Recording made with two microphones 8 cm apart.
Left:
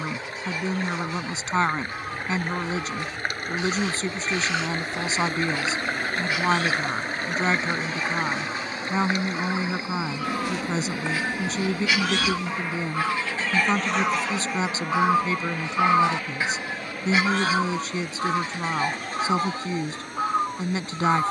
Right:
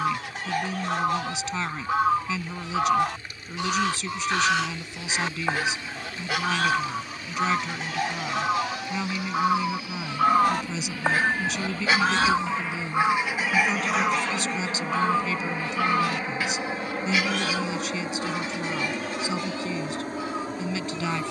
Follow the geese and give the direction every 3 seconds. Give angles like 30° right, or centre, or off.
70° right, 70° right, 70° right, 50° right, 10° right, 30° left, 50° left.